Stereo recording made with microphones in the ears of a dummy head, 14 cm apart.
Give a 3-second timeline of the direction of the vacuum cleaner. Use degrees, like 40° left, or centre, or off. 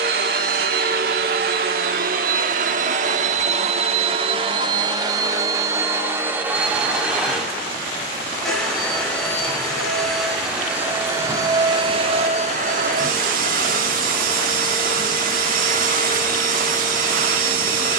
60° right, 30° right, 10° right, 10° right, 50° right, 60° right.